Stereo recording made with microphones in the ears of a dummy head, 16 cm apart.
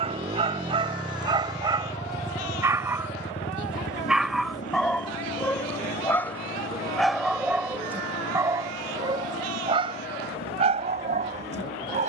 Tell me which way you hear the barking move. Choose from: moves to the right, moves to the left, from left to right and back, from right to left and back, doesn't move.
from right to left and back.